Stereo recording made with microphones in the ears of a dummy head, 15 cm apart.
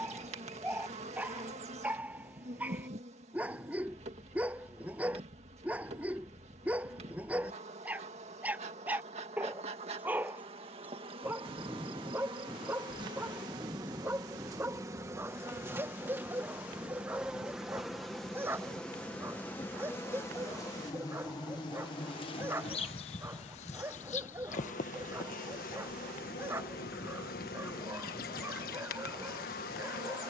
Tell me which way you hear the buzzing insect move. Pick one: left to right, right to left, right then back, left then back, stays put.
right to left.